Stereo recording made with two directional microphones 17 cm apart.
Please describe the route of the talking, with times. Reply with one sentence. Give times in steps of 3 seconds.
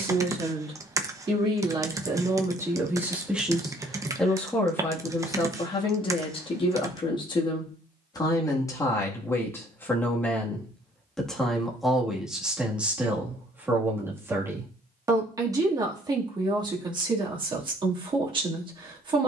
You can hear the talking on the right from 0 s, in the centre from 3 s, on the left from 6 s, in the centre from 9 s and on the right from 15 s.